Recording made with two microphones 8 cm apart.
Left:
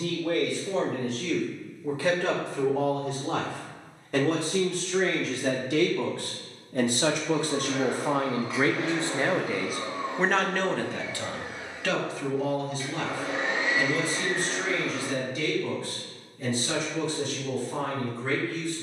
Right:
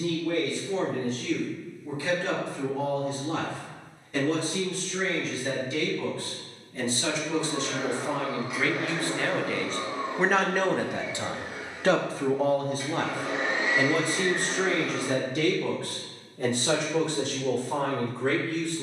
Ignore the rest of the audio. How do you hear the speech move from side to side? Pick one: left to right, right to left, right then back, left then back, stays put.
left to right.